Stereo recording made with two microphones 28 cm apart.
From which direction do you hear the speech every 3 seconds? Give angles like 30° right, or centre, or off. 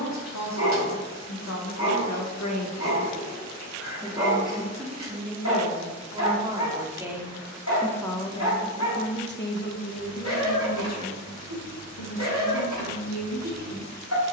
70° left, 10° right, centre, 60° left, 70° left.